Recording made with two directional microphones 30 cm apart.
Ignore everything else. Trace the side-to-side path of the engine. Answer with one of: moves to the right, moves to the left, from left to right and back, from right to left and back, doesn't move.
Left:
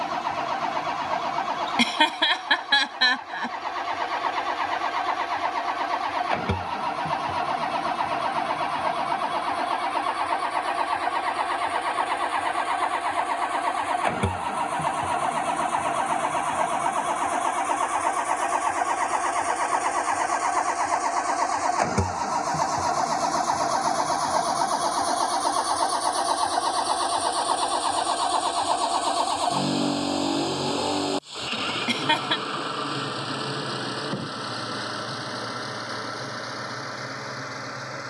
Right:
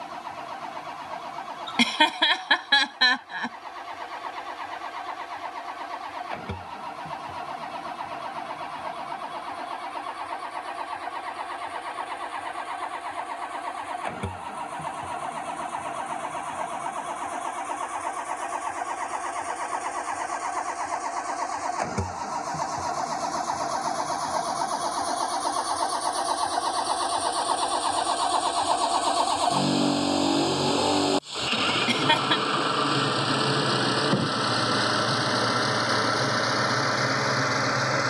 moves to the right.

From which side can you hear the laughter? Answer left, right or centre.
centre.